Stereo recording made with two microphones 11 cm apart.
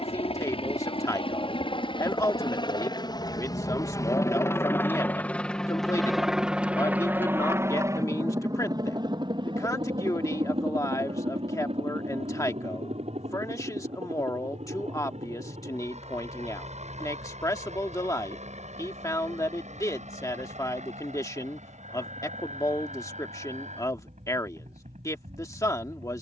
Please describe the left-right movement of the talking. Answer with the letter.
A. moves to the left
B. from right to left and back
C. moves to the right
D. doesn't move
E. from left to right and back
D.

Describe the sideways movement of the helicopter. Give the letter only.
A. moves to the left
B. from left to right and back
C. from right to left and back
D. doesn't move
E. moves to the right
E.